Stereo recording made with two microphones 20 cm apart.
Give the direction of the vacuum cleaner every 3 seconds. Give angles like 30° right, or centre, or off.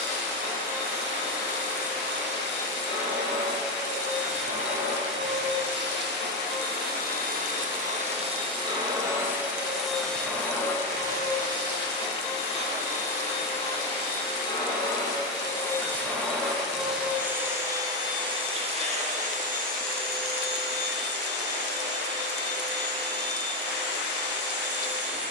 70° right, 70° right, 40° right, 10° left, 30° left, centre, 40° right, 60° right, 60° right.